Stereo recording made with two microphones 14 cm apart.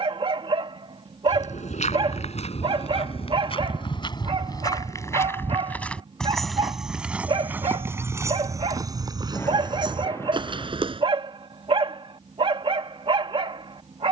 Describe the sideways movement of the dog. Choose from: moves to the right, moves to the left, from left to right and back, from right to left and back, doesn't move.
doesn't move.